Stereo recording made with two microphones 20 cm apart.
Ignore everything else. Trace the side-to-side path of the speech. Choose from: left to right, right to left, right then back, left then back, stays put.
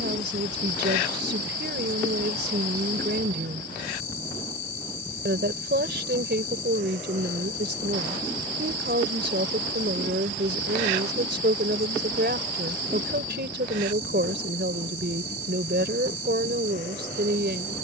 stays put.